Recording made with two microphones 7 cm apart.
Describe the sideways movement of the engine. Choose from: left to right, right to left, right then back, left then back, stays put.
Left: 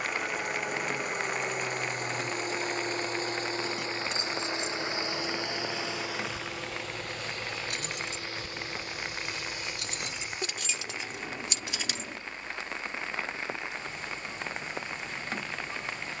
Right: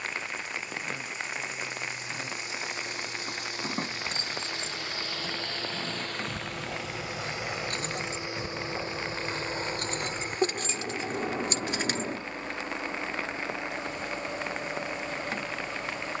left to right.